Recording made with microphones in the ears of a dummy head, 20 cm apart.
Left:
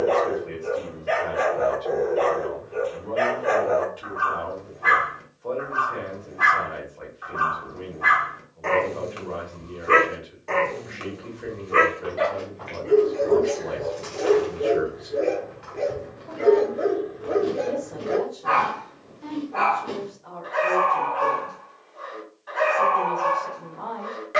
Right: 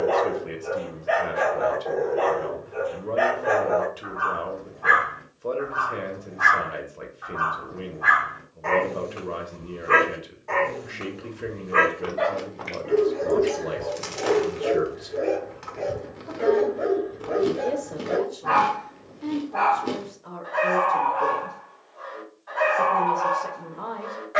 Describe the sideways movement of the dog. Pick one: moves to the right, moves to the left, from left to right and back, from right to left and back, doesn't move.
doesn't move.